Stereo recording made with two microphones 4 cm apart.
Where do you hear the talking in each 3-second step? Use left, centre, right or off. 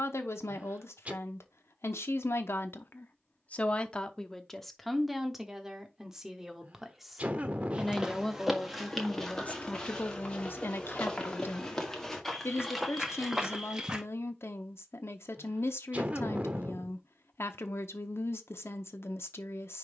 left, centre, centre, left, left, left, left.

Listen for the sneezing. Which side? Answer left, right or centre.
right.